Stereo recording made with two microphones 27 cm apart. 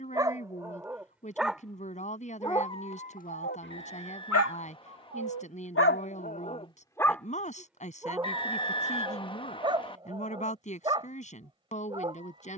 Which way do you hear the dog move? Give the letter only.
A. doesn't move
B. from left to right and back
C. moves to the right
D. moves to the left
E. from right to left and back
E.